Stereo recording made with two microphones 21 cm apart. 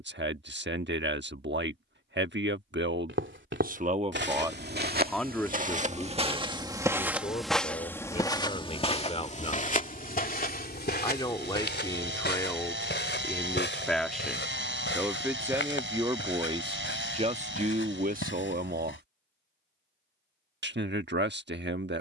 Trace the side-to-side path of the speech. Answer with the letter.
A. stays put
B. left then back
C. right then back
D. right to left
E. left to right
B.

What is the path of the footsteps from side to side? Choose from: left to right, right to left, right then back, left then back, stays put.
right to left.